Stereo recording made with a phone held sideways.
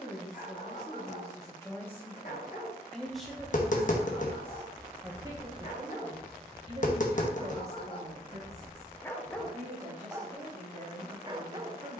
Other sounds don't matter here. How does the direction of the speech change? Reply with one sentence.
You can hear the speech move to the right.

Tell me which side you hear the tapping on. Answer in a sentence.
You can hear the tapping on the left.